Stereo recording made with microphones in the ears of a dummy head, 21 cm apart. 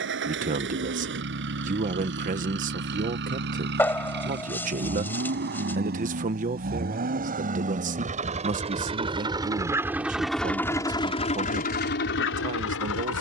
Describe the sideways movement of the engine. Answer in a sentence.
You can hear the engine travel towards the left.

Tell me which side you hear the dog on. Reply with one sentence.
In this clip you hear the dog in the centre.